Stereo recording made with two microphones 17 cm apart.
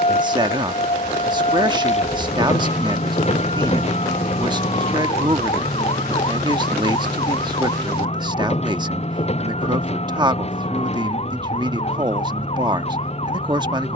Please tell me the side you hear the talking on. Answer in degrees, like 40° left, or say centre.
30° right.